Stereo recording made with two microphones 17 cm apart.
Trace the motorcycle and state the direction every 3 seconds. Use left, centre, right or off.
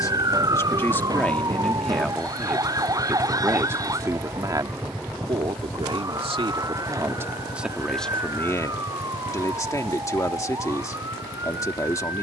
right, centre, left, left.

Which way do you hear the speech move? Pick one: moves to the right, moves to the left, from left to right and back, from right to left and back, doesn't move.
from left to right and back.